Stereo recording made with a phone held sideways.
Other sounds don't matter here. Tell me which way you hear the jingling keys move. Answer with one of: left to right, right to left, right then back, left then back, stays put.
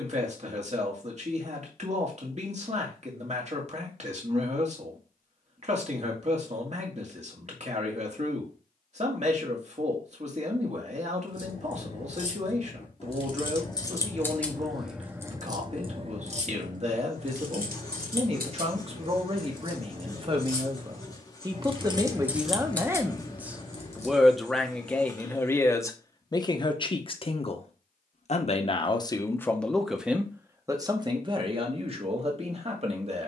right then back.